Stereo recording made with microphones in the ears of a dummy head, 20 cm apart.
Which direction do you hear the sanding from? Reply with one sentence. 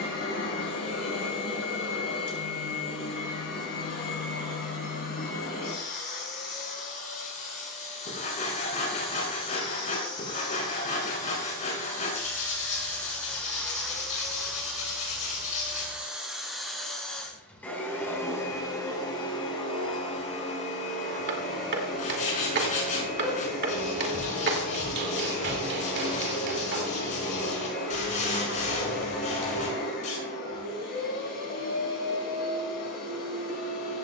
You can hear the sanding on the left.